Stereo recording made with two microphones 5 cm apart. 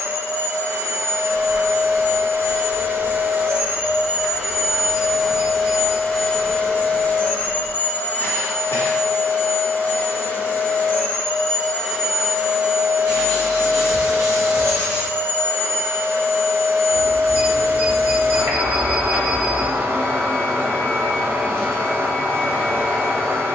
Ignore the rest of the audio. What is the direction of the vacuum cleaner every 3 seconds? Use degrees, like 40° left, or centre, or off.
50° right, 10° right, 30° left, 30° left, 40° right, 50° right, 50° right, 50° right.